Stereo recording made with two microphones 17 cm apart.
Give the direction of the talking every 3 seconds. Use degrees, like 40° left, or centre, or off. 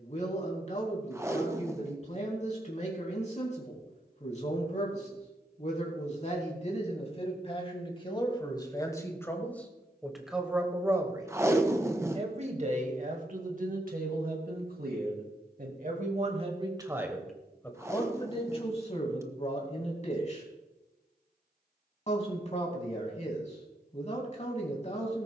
40° left, 40° left, 30° left, centre, 50° right, 30° right, 40° left, 40° left, 40° left.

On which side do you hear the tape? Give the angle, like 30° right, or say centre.
20° right.